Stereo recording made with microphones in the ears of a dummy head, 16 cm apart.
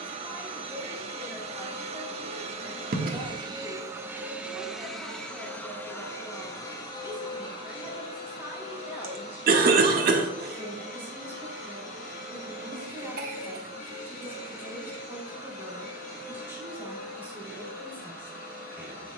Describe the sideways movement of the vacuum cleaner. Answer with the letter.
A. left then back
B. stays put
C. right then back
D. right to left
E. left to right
D.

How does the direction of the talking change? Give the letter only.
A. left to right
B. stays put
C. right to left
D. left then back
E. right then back
B.